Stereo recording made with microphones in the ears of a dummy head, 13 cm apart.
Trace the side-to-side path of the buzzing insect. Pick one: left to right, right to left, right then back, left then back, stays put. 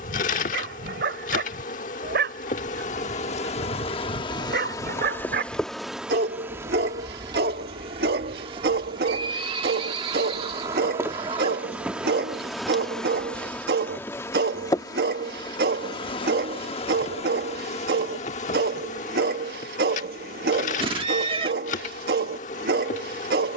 right then back.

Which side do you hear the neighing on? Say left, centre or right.
right.